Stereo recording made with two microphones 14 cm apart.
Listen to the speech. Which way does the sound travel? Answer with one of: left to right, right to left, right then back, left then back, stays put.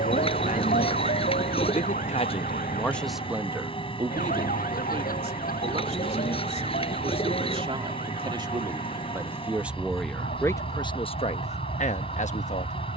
right then back.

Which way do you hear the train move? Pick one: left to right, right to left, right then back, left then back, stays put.
stays put.